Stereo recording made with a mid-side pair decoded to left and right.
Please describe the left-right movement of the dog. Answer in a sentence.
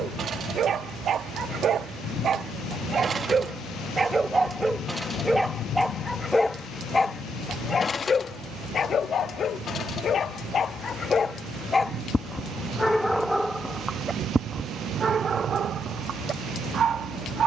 In this clip you hear the dog move from right to left and back again.